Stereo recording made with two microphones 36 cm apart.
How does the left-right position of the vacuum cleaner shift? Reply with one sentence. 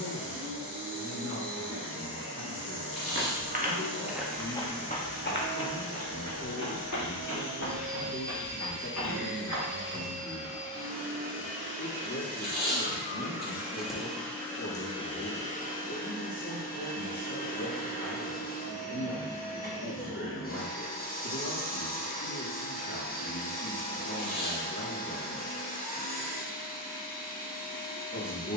In this clip you hear the vacuum cleaner travel towards the left.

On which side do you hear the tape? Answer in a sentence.
You can hear the tape on the right.